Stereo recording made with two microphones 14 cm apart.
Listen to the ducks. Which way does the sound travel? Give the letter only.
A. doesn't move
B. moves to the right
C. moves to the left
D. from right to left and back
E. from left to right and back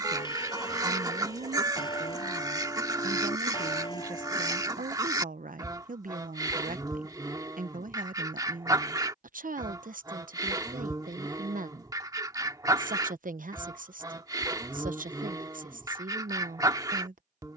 A.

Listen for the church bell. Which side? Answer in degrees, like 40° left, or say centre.
30° left.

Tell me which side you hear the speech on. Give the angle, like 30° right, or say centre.
80° right.